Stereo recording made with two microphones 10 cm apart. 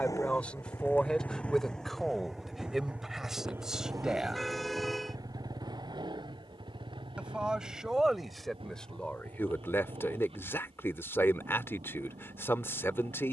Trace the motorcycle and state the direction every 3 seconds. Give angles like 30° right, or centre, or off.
10° left, 30° right, 50° right, 60° right, 70° right.